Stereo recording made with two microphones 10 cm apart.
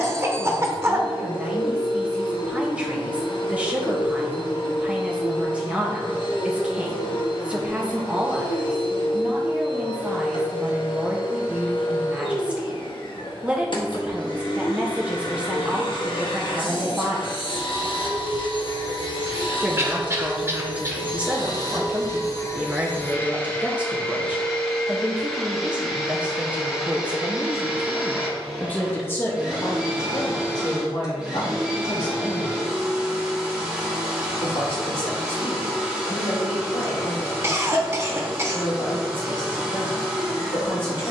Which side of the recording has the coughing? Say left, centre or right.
right.